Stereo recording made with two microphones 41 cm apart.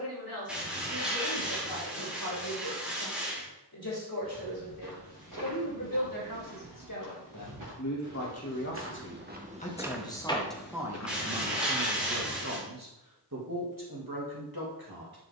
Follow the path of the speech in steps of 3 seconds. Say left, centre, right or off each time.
left, left, left, centre, right.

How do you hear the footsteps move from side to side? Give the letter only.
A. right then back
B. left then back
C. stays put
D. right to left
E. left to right
D.